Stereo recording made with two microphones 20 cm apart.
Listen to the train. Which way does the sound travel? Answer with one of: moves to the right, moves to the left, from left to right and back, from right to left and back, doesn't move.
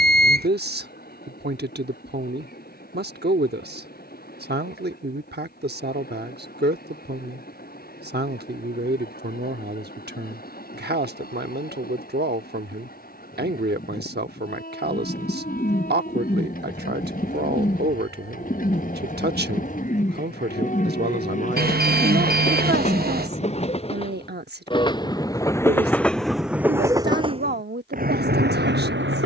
moves to the right.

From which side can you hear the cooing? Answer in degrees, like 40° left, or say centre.
40° left.